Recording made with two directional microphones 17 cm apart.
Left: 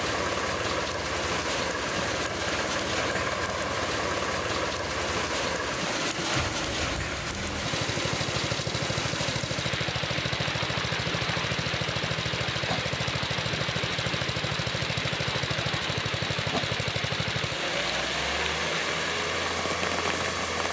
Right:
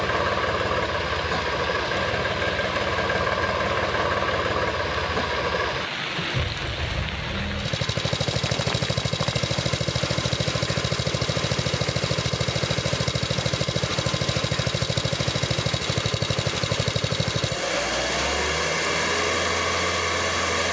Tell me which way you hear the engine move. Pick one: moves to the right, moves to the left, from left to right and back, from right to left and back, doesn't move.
doesn't move.